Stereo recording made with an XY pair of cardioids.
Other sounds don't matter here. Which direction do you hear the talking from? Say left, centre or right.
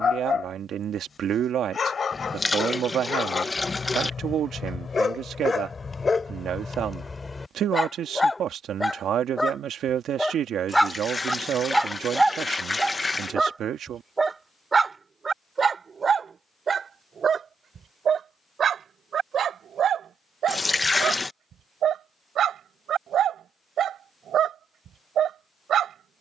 right.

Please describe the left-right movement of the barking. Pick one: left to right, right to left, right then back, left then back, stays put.
left to right.